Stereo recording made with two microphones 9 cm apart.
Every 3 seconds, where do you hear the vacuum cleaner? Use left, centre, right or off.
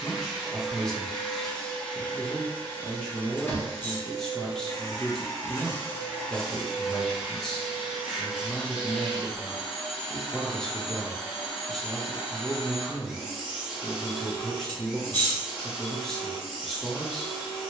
centre, left, centre, centre, centre, centre.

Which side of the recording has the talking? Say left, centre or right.
centre.